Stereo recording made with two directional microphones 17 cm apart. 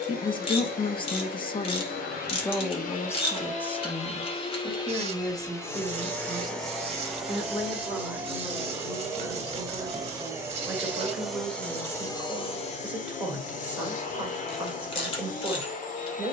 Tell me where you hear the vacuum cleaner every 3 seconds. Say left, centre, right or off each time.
left, left, centre, centre, left, left.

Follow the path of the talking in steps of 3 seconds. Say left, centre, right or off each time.
left, centre, centre, centre, centre, centre.